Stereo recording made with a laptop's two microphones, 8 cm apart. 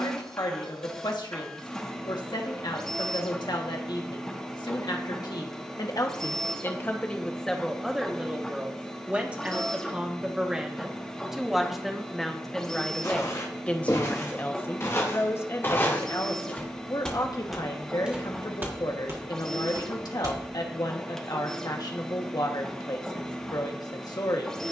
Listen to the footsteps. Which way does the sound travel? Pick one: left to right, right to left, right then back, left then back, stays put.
left to right.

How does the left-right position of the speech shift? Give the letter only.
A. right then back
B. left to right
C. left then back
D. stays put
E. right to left
A.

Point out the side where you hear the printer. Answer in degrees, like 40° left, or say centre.
10° left.